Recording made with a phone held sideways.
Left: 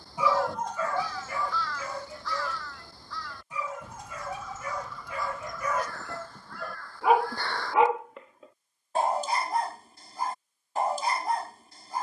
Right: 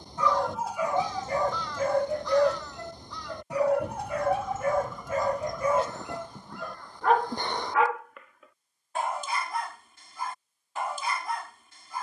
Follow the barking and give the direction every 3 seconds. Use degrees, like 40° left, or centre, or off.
40° right, 50° right, 10° left, 40° left.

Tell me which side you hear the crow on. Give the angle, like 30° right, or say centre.
20° right.